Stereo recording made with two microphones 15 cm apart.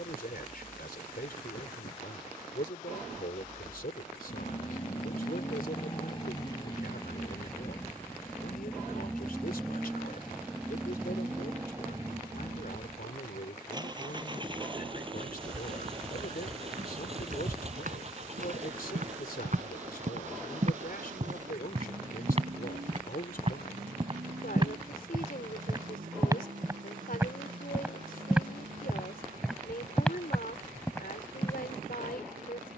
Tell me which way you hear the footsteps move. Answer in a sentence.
You can hear the footsteps move to the left.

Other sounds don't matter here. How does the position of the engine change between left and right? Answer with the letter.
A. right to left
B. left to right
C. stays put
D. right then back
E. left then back
B.